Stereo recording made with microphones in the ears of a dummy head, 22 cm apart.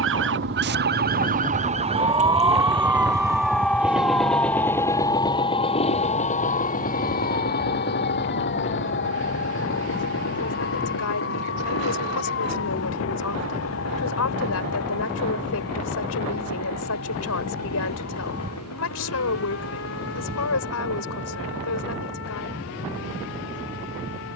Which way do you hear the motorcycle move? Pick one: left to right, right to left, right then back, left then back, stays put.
right to left.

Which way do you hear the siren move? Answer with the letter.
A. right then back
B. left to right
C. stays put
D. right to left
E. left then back
D.